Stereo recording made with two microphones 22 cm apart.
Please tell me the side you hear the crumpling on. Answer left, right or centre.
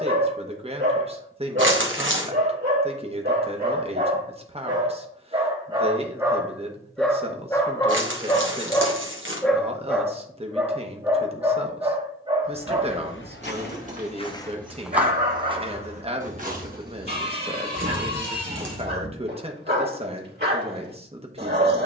right.